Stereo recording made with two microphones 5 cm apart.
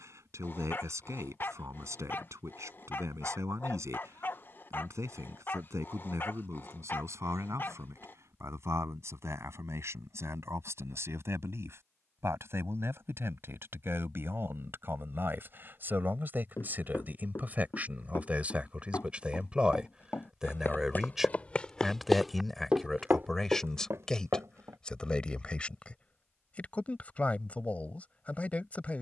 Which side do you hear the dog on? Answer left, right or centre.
left.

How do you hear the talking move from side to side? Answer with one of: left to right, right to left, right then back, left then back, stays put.
right to left.